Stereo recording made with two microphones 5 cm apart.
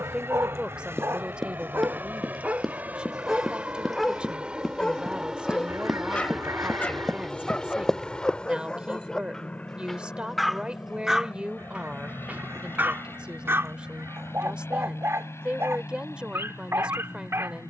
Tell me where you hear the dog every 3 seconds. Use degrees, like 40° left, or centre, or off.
60° right, 10° left, 20° left, centre, 50° right, 60° right.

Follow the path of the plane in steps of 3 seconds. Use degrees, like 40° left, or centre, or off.
50° right, 20° right, 10° left, 30° left, 50° left, 60° left.